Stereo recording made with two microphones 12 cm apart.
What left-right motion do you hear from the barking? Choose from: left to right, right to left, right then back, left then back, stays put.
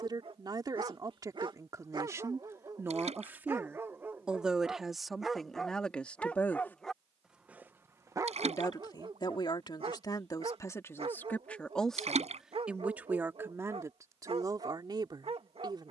left then back.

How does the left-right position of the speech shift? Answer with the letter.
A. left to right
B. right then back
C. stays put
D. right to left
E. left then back
E.